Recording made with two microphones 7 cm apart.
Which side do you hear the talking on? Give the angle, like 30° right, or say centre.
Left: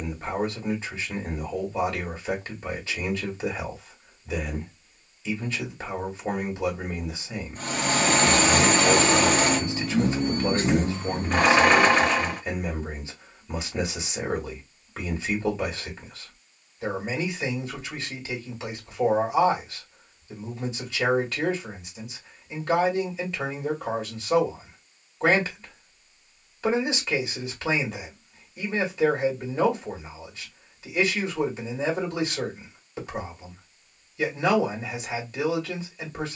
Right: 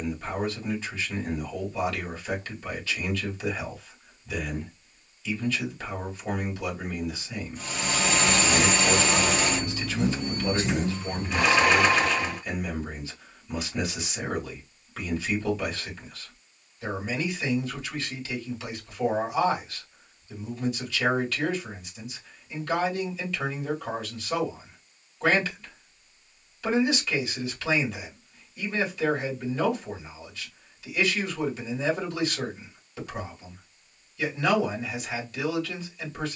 30° left.